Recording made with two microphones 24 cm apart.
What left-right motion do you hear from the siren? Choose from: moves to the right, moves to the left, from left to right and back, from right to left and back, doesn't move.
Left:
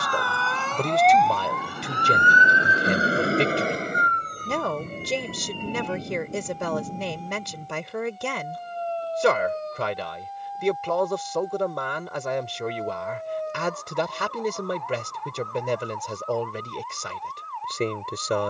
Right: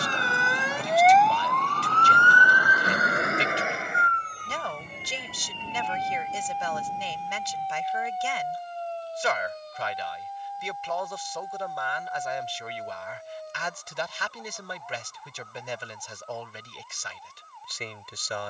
moves to the left.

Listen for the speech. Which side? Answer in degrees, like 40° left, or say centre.
60° left.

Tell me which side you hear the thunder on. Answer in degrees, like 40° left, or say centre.
40° left.